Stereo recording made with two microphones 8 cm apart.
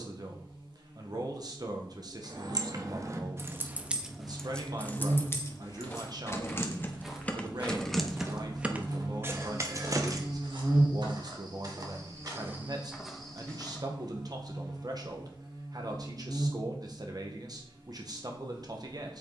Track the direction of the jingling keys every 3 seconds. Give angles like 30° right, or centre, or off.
50° right, 10° left, 10° left, 40° right, off, off, off.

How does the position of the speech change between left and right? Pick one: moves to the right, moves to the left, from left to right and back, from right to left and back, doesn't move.
doesn't move.